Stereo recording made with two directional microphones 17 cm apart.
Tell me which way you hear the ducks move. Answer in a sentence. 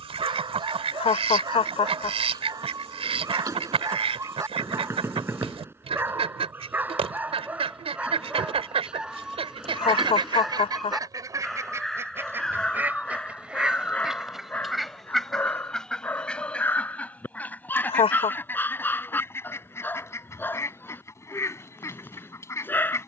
In this clip you hear the ducks go from the right side to the left.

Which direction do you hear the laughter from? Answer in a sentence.
In this clip you hear the laughter on the left.